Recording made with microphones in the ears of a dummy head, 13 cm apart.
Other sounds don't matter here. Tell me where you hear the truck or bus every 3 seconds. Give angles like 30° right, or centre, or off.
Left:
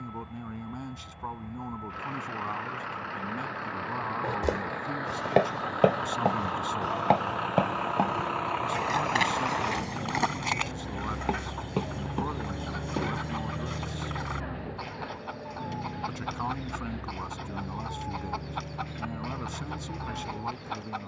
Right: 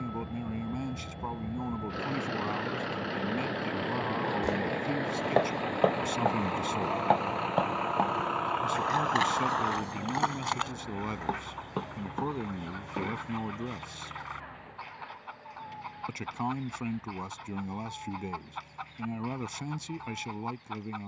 40° right, 30° right, centre, 20° left, 50° left, 60° left, 70° left.